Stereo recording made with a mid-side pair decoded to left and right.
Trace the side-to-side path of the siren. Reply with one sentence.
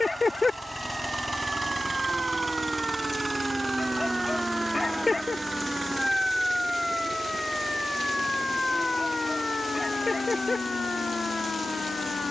In this clip you hear the siren move from right to left.